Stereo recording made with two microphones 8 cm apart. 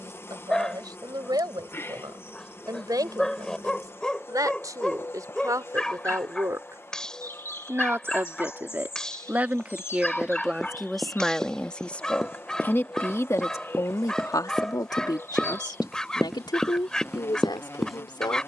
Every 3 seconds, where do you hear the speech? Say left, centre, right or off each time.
right, right, right, centre, left, left.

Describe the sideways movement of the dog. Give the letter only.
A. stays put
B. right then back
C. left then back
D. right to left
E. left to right
A.